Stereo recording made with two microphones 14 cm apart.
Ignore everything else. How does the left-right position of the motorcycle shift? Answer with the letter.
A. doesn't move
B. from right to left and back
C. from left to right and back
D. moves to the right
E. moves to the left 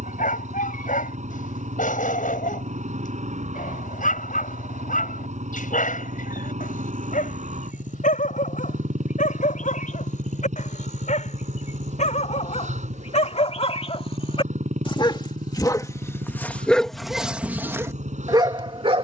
A.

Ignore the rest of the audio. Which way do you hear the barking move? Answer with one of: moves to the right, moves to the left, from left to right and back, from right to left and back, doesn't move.
moves to the right.